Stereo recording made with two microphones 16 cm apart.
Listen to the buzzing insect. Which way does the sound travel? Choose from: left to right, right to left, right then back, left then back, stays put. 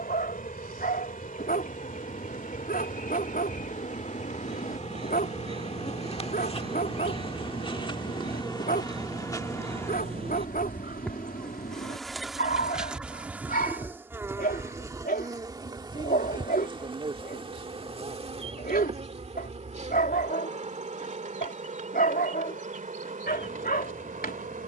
left to right.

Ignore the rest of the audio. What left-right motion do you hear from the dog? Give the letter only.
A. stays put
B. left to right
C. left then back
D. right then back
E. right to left
A.